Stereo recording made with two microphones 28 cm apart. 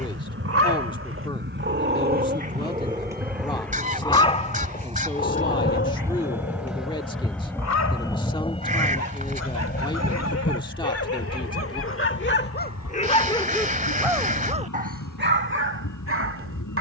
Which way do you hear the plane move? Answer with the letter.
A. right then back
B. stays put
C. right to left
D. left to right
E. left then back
C.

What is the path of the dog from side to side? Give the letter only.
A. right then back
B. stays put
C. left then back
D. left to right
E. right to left
C.